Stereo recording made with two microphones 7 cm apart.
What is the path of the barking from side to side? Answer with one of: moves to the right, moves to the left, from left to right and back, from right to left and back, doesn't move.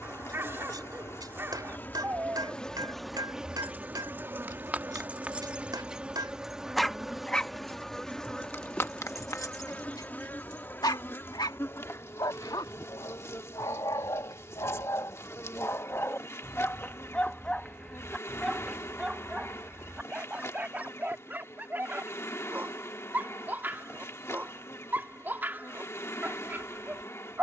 from right to left and back.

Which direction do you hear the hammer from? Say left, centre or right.
right.